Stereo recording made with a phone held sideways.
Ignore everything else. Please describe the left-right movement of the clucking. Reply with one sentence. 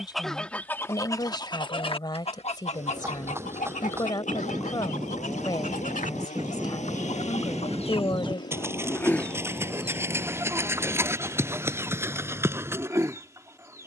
In this clip you hear the clucking move from right to left and back again.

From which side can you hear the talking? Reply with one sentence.
In this clip you hear the talking on the left.